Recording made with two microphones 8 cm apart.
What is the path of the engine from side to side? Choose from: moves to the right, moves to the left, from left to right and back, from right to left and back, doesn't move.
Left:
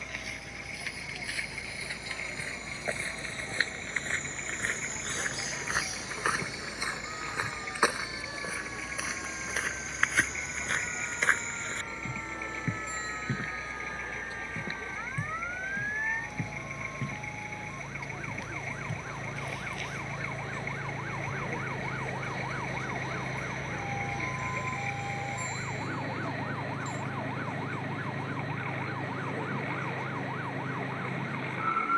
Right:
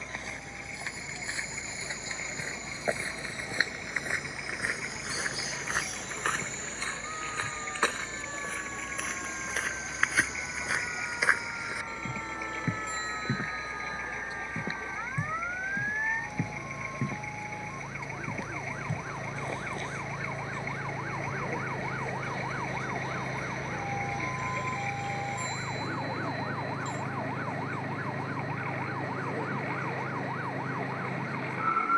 doesn't move.